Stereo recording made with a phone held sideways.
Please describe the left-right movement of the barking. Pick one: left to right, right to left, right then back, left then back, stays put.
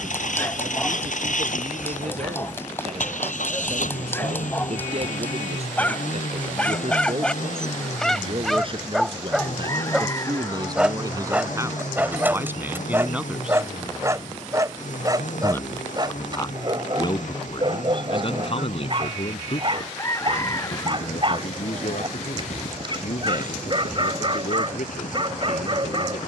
left to right.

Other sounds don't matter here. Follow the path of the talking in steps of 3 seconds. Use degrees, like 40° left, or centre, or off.
60° right, 50° right, 50° right, 30° right, 10° right, 30° left, 50° left, 70° left, 70° left.